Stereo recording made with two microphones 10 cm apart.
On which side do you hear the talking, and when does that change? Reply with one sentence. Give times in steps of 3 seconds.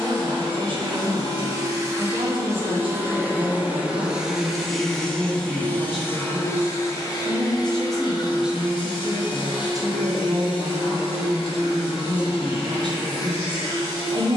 You can hear the talking on the right from 0 s, in the centre from 6 s and on the right from 9 s.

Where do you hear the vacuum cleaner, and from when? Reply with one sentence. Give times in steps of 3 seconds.
You can hear the vacuum cleaner on the right from 0 s, in the centre from 3 s and on the left from 6 s.